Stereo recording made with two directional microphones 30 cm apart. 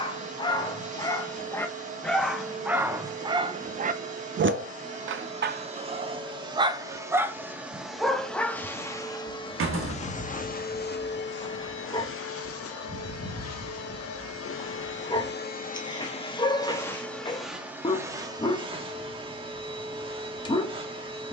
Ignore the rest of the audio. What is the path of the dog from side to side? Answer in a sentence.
You can hear the dog go right and come back.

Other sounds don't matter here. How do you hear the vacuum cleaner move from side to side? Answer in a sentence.
You can hear the vacuum cleaner go left and come back.